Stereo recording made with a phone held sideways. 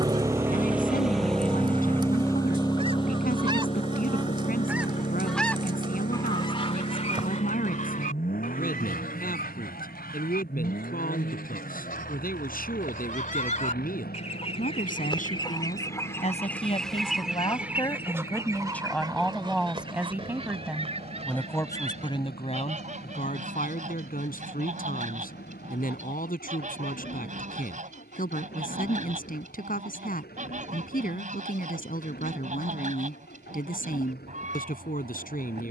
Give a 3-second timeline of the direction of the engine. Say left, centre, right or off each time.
centre, left, left, left, left, left, left, left, left, left, left, left.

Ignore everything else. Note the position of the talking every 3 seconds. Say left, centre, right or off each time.
left, left, left, left, left, left, centre, left, left, left, left, left.